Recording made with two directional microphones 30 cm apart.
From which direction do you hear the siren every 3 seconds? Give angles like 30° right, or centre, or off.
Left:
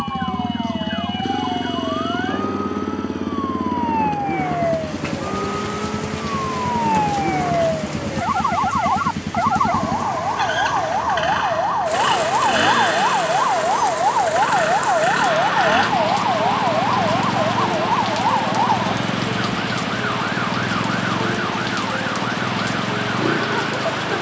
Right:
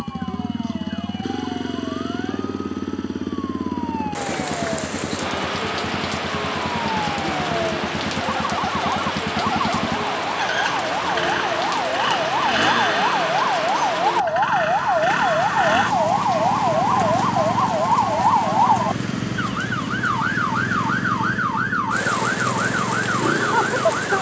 60° left, 50° left, 50° left, 30° left, 10° left, 10° right, 30° right, 50° right.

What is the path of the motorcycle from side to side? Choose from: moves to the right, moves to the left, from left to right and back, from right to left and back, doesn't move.
doesn't move.